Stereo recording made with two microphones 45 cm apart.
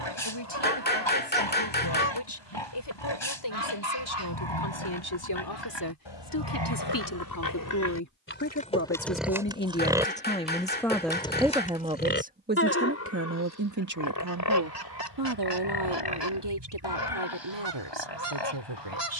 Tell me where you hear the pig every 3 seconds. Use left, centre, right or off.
left, left, left, centre, left, left, left.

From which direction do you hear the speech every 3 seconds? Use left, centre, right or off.
left, left, left, centre, right, right, right.